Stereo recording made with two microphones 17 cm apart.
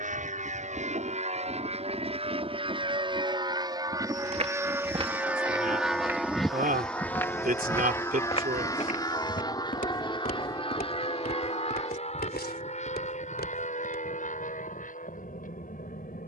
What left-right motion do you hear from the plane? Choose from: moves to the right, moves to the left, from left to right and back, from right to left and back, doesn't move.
moves to the left.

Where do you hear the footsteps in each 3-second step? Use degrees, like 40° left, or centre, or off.
off, 30° right, 20° left, 60° left, 70° left, off.